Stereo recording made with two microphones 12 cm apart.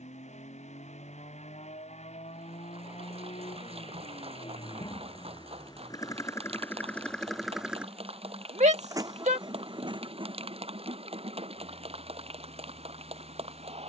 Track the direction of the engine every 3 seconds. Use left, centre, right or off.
left, left, centre, right, right.